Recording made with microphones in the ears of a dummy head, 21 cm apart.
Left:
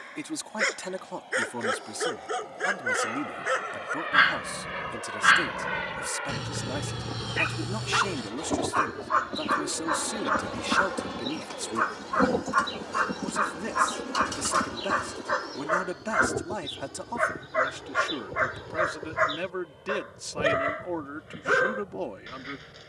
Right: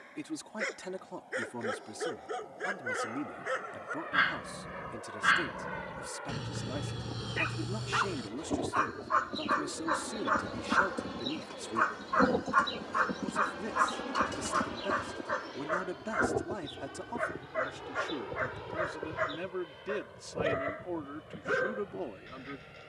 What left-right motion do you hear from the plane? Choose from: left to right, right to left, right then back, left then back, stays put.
left to right.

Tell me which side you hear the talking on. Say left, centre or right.
left.